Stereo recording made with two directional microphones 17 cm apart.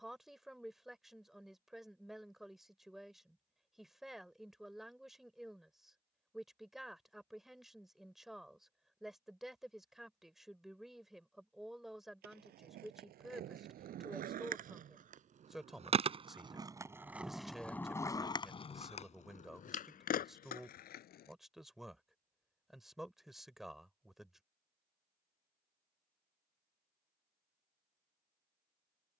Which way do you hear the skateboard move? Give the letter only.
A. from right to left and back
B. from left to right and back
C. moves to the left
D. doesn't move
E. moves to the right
C.